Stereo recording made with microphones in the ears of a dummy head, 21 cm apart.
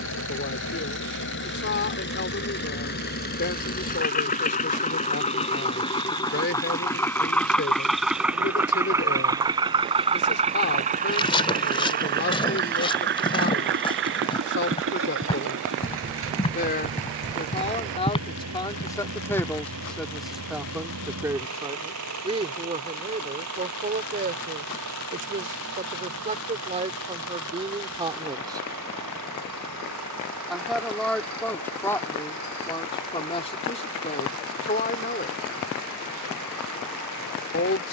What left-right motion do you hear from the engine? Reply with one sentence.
In this clip you hear the engine move to the right.